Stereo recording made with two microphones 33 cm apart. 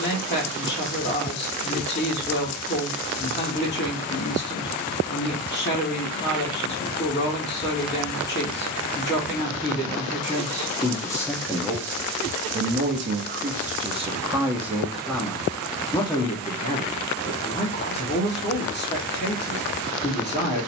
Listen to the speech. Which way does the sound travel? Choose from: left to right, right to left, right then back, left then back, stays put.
right then back.